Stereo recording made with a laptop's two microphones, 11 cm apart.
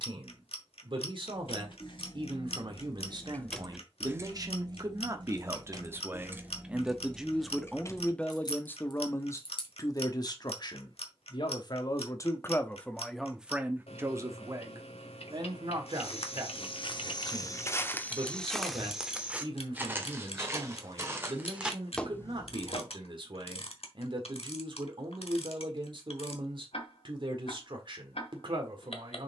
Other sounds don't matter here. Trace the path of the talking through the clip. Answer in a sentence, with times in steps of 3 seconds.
You can hear the talking on the right from 0 s, in the centre from 6 s, on the left from 9 s, in the centre from 12 s and on the right from 15 s.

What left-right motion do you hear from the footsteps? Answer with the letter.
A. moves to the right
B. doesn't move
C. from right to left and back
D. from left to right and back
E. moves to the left
D.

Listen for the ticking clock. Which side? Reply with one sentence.
In this clip you hear the ticking clock on the left.